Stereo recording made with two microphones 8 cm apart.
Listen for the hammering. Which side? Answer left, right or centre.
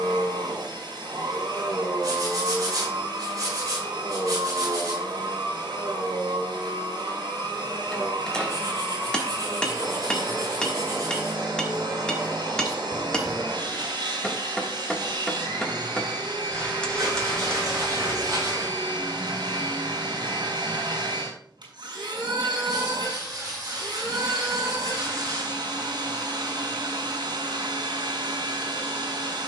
centre.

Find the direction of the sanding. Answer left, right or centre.
right.